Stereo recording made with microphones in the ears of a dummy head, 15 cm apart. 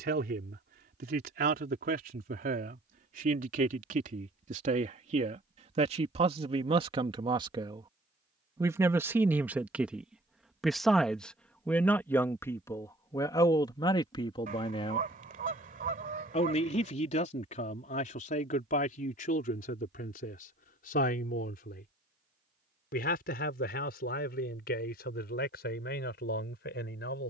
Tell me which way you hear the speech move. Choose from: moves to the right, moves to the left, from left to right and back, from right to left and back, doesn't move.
moves to the left.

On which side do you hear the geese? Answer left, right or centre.
right.